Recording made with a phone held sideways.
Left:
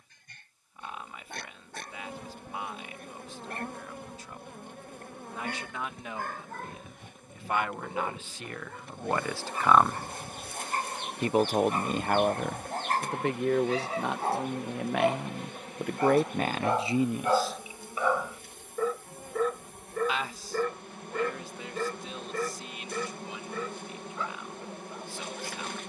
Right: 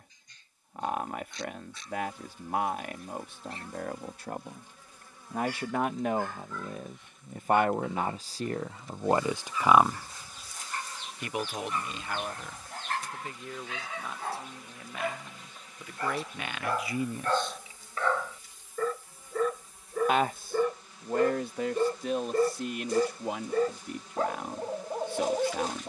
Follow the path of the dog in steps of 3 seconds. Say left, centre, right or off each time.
left, left, left, left, left, left, centre, right, right.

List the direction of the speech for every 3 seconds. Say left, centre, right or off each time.
right, right, right, centre, left, left, right, right, right.